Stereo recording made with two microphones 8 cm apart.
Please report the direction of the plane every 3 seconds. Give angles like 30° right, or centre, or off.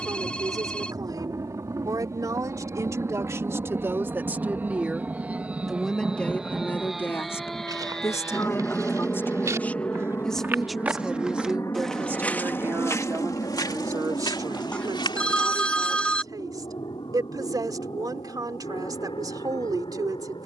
40° right, 20° right, centre, 30° left, 50° left, 60° left, 70° left.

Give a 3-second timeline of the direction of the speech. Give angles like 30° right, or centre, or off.
50° right, 20° right, 30° left, centre, 40° right, 50° right, 50° right.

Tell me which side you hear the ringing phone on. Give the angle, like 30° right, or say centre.
10° left.